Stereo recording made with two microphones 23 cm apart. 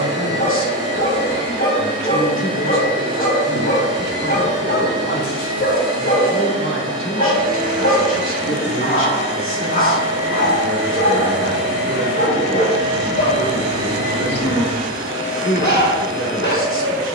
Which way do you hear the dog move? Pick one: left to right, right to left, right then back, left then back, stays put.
stays put.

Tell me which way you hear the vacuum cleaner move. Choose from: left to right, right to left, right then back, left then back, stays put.
stays put.